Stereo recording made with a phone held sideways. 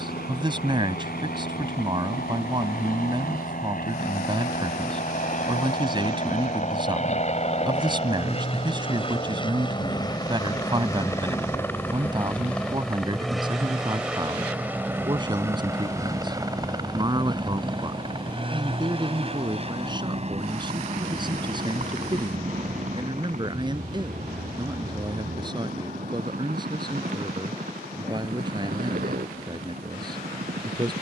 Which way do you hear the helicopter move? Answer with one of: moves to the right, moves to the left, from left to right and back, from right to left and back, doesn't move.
moves to the right.